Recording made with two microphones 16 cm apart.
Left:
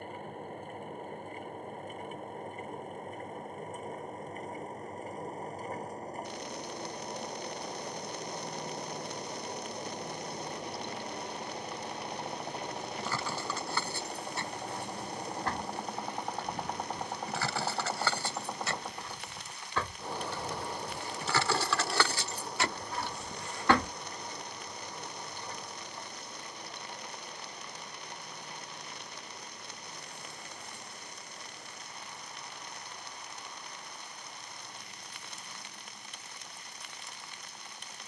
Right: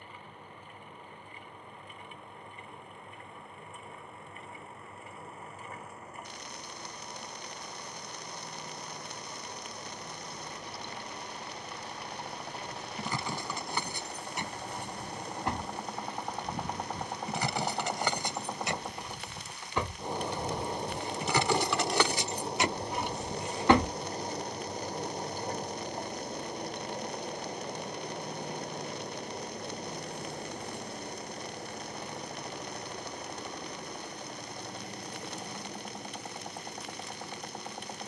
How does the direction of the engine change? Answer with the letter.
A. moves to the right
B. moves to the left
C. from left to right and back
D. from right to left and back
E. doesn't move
A.